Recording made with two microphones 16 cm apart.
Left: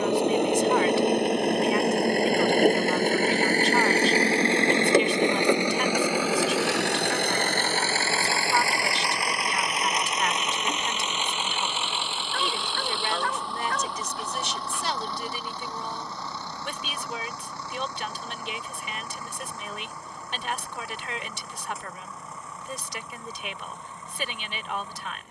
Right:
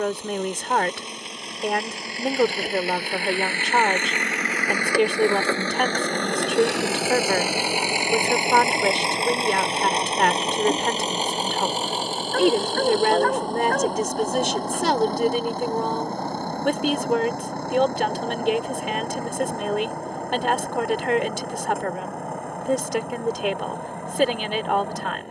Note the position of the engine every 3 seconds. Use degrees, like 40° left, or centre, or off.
60° left, 30° left, 10° right, 30° right, 40° right, 50° right, 60° right, 60° right, 60° right.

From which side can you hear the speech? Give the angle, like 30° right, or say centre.
70° right.